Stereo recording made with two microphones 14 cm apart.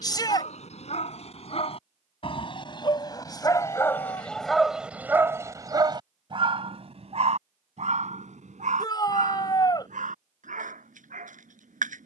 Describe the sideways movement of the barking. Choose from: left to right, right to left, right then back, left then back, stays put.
left to right.